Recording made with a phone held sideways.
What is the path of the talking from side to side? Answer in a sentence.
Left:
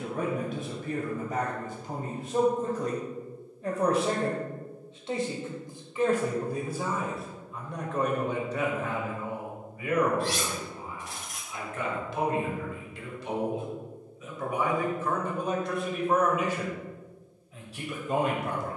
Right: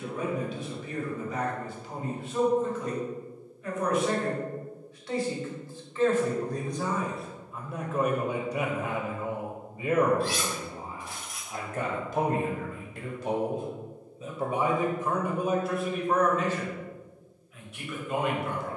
You can hear the talking move from left to right and back again.